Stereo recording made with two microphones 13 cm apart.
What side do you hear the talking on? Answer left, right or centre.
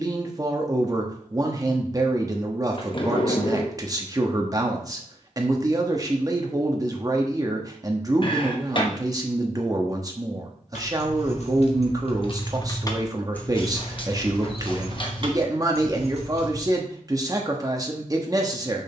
right.